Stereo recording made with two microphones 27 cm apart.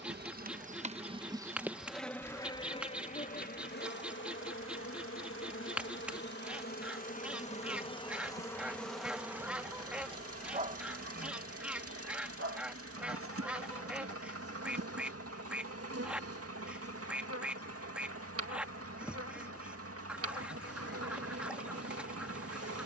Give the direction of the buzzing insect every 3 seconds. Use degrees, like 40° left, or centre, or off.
10° right, 40° left, 20° left, 20° right, 50° right, 60° right, 60° right, 60° right.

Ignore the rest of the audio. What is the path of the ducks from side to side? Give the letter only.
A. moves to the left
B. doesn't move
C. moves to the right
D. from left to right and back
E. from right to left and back
B.